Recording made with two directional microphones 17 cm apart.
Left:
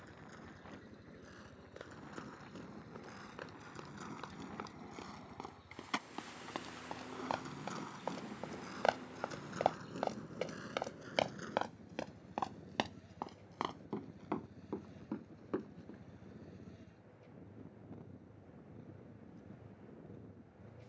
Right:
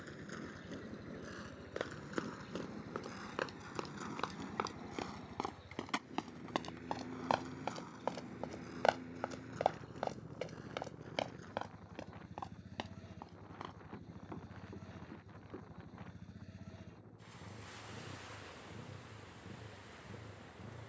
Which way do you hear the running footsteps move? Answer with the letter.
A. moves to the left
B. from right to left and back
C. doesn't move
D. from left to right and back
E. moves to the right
A.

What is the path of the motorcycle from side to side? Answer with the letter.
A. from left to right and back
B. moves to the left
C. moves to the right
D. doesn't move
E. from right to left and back
D.